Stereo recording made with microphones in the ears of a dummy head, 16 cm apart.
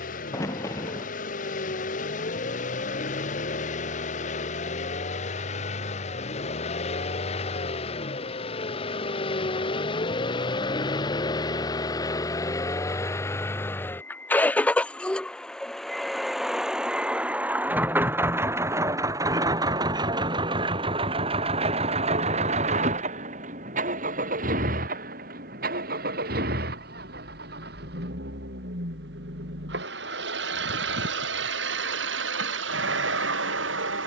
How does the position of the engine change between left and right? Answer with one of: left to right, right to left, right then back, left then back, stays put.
left to right.